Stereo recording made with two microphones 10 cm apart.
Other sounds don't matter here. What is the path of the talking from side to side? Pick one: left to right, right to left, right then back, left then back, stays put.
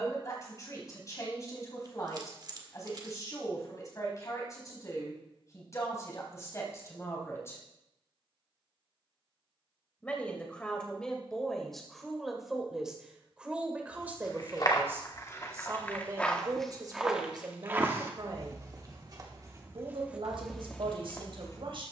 left to right.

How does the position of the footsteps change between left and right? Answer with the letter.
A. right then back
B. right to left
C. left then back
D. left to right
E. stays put
A.